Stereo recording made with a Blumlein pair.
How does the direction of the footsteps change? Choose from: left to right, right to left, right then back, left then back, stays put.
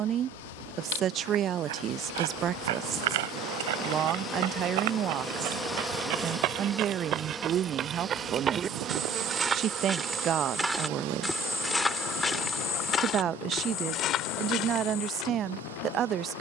right to left.